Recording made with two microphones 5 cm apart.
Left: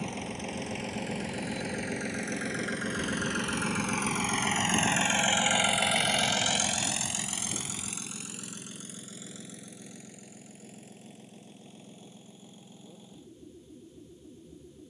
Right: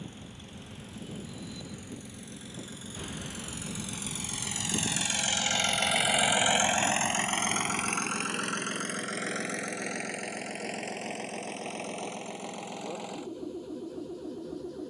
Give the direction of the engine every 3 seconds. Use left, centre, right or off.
left, left, right, right, right.